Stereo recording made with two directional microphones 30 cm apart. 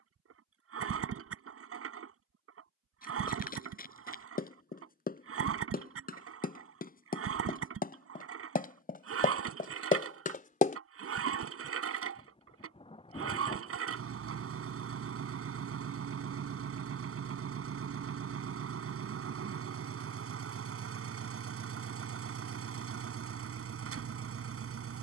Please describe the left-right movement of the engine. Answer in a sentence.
In this clip you hear the engine stay in one place.